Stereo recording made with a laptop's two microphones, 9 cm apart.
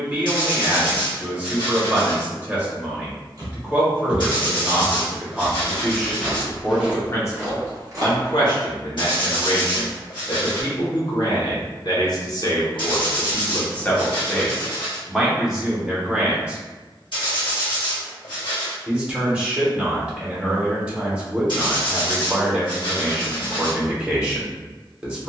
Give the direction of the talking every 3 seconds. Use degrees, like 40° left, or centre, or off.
20° right, 10° right, 30° left, 60° left, 30° left, 10° right, 10° right, 10° right, 10° right.